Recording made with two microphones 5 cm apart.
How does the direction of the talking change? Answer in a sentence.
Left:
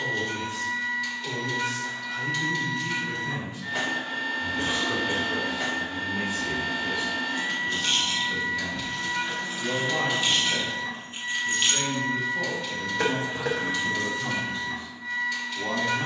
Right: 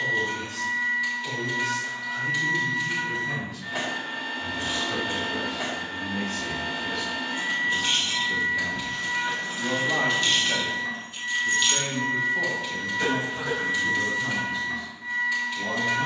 In this clip you hear the talking move from left to right and back again.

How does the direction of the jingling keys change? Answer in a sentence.
You can hear the jingling keys move to the left.